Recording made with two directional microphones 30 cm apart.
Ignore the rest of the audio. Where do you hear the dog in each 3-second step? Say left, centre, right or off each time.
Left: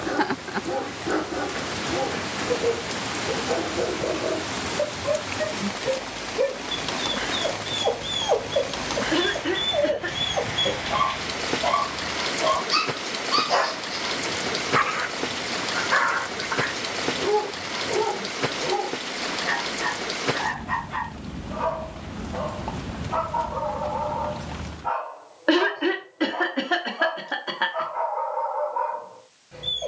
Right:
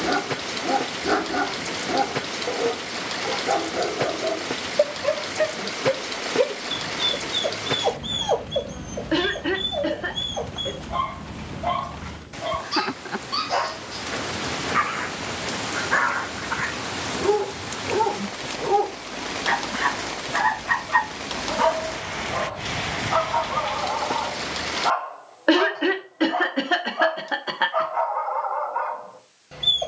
right, right, centre, left, left, centre, right, right, right, right.